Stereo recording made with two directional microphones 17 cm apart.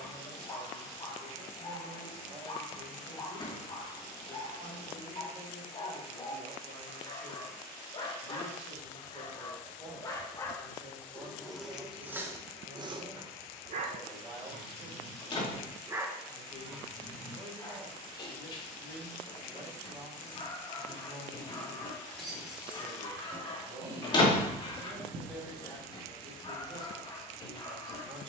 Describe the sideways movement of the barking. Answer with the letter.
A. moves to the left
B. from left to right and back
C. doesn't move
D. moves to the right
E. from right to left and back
B.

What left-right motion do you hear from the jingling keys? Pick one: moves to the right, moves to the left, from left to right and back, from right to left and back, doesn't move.
moves to the right.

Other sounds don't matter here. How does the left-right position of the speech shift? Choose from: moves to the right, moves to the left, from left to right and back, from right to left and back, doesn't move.
doesn't move.